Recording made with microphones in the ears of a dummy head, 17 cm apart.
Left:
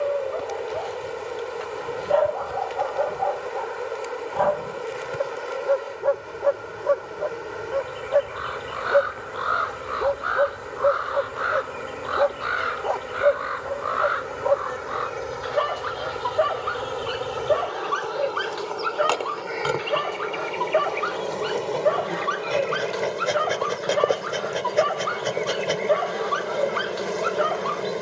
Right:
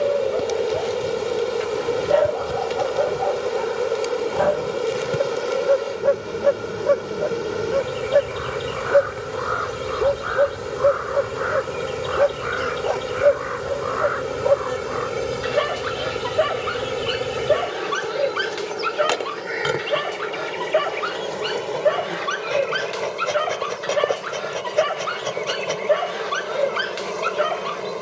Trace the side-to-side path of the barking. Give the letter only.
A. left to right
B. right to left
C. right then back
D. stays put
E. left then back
D.